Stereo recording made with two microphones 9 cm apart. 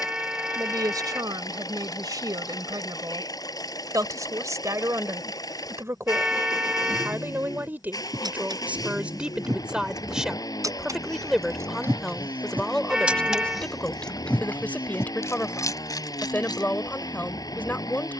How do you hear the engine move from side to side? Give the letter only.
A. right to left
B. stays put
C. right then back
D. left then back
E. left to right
B.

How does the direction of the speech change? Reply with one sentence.
In this clip you hear the speech travel towards the left.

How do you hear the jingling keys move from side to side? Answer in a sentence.
You can hear the jingling keys travel towards the left.